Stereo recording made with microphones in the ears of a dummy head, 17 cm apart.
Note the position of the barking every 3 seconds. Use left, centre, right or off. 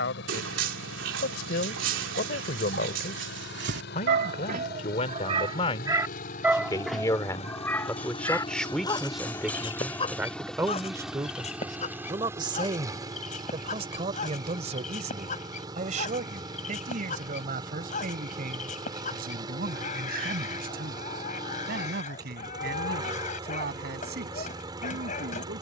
right, right, centre, left, left, left, left, left, left.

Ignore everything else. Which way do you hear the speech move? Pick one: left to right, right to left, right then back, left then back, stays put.
left to right.